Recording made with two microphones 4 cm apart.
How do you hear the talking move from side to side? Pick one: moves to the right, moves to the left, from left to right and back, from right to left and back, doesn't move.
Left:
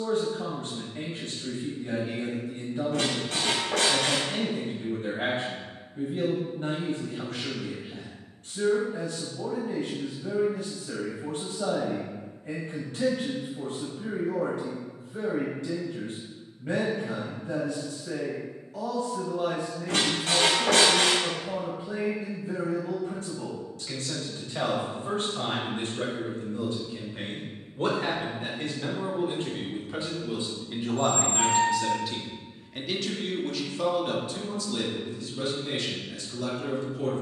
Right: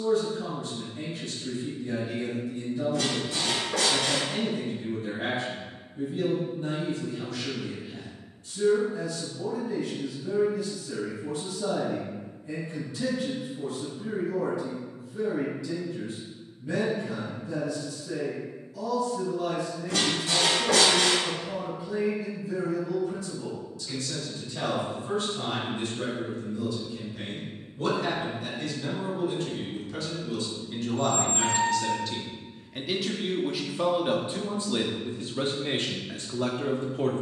moves to the right.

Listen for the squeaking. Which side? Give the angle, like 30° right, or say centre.
60° left.